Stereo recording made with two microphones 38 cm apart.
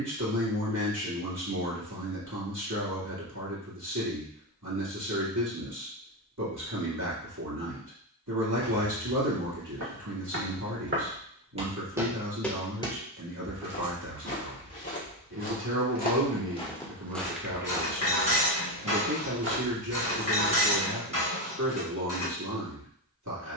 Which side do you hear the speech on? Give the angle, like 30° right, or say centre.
50° right.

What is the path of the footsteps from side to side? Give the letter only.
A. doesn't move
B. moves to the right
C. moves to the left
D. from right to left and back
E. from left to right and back
D.